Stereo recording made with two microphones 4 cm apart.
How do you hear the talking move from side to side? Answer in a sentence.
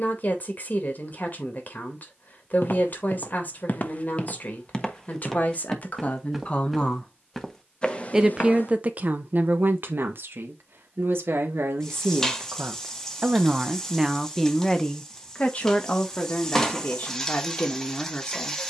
In this clip you hear the talking move from left to right and back again.